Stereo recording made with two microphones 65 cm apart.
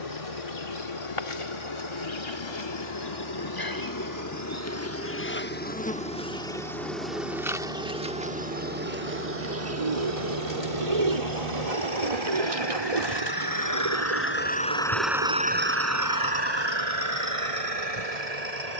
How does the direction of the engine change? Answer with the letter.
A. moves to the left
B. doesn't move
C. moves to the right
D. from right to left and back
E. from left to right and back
C.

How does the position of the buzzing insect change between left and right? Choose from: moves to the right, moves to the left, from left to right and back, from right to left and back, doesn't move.
moves to the right.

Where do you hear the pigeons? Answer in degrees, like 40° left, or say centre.
70° right.